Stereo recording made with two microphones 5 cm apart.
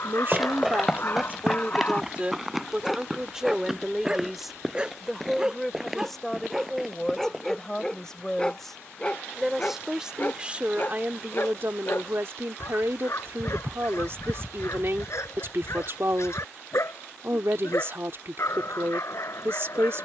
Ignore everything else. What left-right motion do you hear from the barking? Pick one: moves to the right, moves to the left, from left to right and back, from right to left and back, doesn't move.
from left to right and back.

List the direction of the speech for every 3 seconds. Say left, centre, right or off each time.
right, centre, centre, right, right, right, right.